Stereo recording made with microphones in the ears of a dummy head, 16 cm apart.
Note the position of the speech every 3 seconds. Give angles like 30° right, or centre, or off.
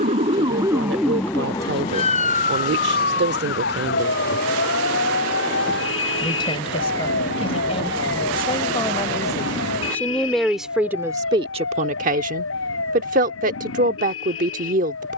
70° right, 60° right, 30° left, 10° right, 50° right.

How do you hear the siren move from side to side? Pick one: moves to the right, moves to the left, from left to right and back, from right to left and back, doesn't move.
moves to the left.